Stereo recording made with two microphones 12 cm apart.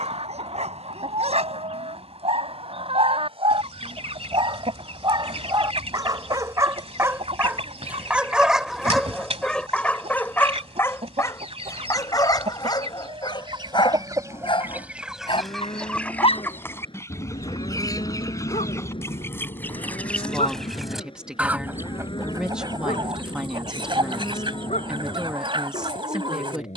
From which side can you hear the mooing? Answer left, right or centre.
left.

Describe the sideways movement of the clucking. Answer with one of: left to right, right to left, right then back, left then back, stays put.
left then back.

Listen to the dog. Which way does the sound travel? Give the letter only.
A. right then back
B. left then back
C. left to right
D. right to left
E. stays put
D.